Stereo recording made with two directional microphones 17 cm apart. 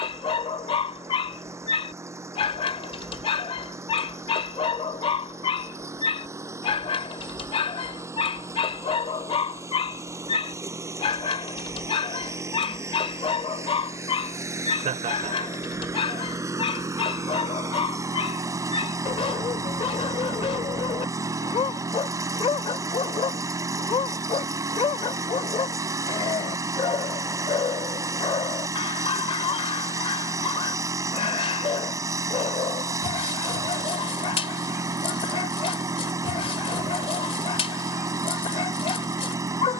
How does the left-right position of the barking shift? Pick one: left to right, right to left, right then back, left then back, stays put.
stays put.